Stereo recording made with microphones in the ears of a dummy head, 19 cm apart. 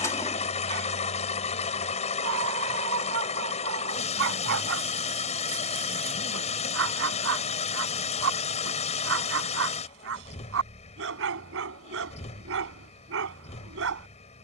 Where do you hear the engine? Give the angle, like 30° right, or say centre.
30° left.